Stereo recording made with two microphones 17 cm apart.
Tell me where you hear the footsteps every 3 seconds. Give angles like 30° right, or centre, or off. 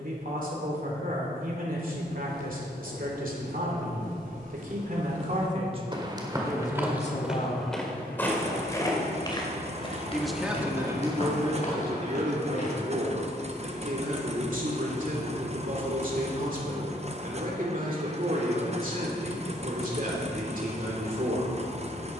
70° right, 50° right, centre, 30° left, 50° left, off, off, off.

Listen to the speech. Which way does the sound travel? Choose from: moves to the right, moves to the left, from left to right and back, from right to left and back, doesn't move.
from right to left and back.